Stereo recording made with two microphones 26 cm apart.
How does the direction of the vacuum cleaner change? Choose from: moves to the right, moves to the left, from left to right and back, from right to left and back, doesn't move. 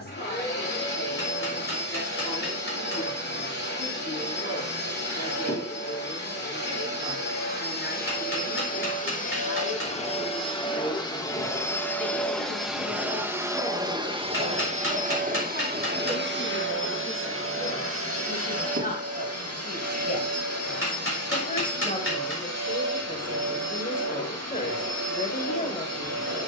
moves to the right.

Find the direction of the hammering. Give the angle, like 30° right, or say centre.
50° left.